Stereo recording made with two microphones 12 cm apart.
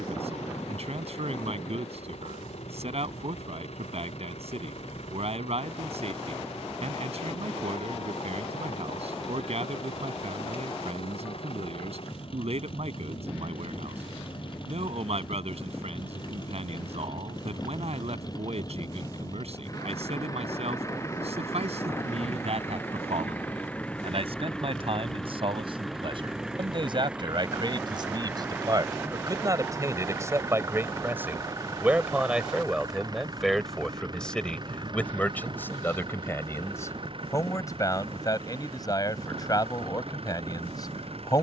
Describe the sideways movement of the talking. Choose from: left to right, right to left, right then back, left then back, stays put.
right to left.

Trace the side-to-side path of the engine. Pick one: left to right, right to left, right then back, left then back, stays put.
left to right.